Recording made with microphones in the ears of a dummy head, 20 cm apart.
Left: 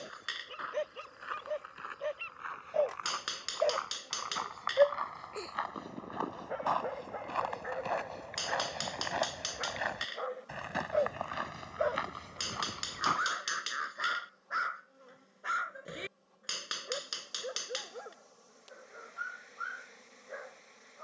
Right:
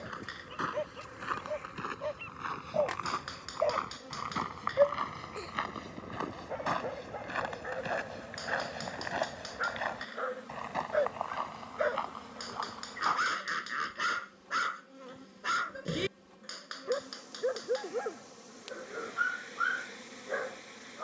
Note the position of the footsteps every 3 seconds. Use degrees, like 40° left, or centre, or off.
60° right, 50° right, 20° right, 10° left, 30° left, off, off.